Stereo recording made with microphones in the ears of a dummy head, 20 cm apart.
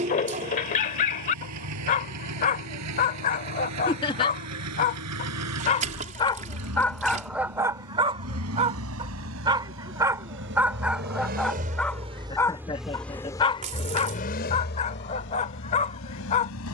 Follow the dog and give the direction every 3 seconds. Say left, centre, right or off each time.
left, left, centre, centre, left, left.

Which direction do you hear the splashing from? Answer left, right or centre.
right.